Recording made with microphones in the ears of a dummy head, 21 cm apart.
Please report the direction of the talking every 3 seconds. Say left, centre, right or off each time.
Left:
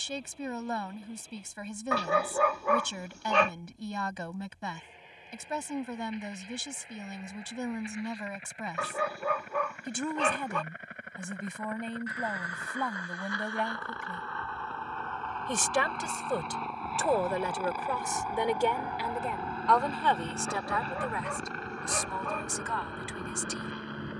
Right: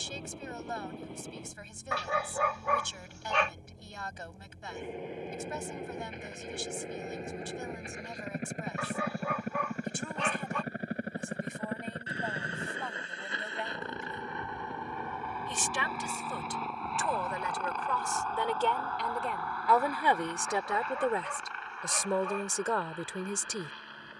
left, left, left, left, left, left, centre, right.